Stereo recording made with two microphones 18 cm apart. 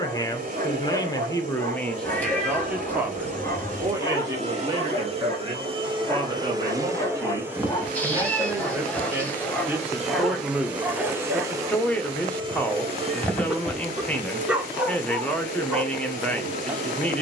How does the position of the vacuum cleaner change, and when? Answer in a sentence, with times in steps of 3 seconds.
In this clip you hear the vacuum cleaner on the right from 0 s, in the centre from 6 s and on the right from 12 s.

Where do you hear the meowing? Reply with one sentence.
You can hear the meowing in the centre.